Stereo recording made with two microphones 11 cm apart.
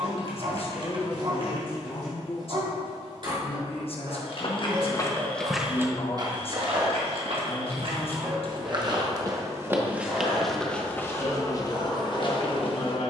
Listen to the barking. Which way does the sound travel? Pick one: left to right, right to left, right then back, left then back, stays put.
right to left.